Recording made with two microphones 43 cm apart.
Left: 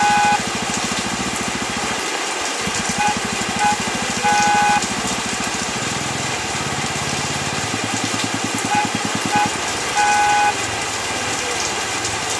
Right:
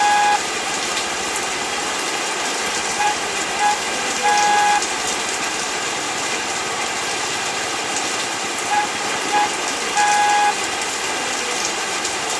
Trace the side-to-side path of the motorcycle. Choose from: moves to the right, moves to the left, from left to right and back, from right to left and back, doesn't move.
doesn't move.